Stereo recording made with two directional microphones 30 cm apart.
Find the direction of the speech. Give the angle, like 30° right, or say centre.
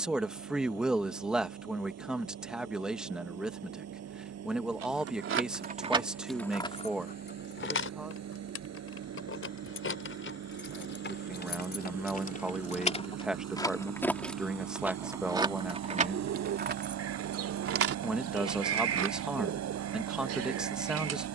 centre.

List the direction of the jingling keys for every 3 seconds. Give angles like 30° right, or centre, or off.
off, 40° right, 30° left, 40° left, 10° left, 30° right, 50° right.